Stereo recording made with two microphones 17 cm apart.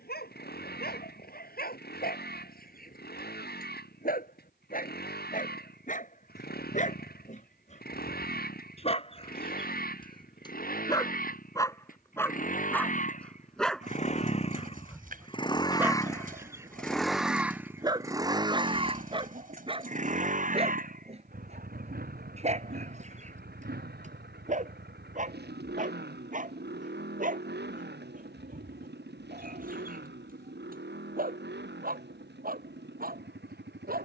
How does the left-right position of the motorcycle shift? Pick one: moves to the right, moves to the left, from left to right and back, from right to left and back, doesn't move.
moves to the right.